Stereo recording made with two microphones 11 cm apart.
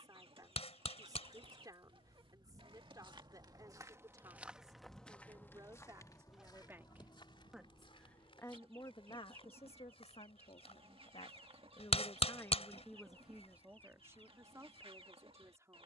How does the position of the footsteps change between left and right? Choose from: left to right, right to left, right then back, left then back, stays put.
right to left.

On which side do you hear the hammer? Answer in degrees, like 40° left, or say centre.
70° left.